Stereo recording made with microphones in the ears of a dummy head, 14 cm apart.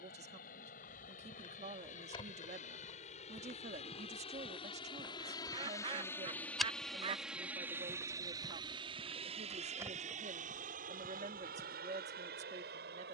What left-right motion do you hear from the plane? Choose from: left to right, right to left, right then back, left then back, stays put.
left to right.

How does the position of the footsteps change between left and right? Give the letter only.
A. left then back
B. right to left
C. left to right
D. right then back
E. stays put
C.